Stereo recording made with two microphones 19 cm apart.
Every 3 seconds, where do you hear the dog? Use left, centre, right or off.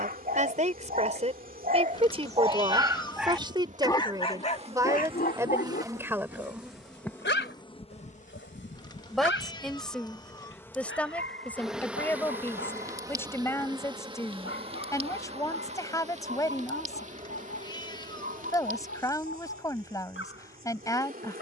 right, left, left, left, left, left, left.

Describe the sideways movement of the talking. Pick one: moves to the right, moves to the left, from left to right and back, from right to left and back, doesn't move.
moves to the left.